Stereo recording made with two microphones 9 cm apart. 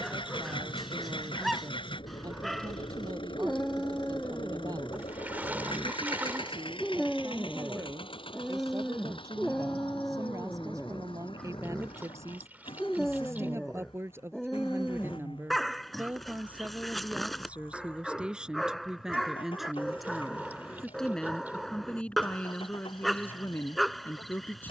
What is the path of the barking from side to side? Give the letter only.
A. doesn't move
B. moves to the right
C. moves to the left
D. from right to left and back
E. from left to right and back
A.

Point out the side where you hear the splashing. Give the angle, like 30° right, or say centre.
20° right.